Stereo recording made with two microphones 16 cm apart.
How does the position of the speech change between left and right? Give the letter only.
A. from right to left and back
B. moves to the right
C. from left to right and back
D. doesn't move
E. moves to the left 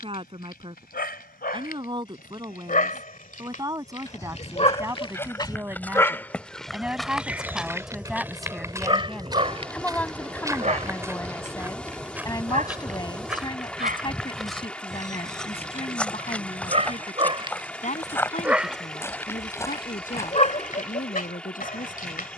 E.